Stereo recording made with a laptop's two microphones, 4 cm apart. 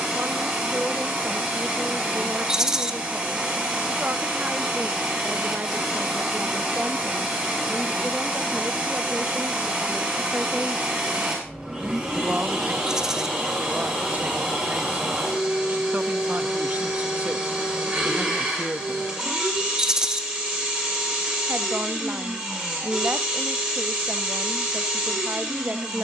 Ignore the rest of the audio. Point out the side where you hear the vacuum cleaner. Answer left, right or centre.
right.